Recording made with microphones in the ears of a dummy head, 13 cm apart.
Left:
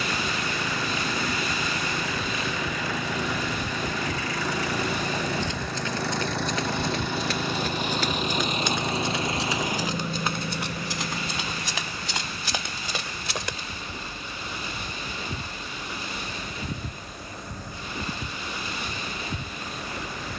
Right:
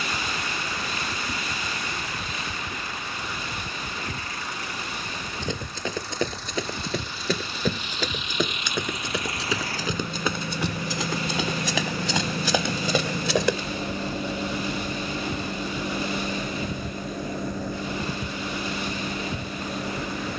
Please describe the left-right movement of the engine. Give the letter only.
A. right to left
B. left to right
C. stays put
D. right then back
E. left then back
B.